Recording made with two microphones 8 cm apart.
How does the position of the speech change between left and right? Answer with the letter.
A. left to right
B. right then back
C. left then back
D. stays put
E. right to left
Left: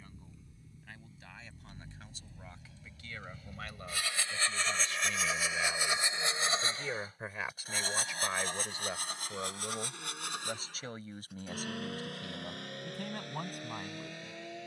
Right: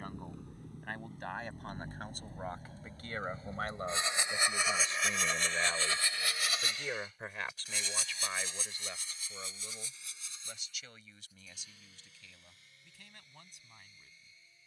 E.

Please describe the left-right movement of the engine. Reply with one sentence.
You can hear the engine go from the right side to the left.